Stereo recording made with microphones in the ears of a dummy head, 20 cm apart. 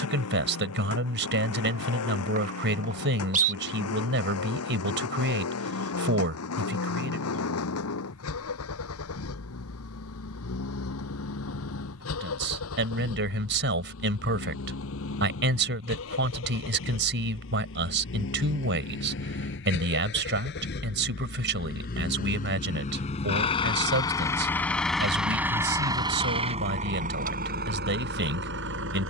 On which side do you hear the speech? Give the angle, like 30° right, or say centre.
60° right.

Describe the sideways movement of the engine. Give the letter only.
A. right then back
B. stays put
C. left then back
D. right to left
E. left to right
E.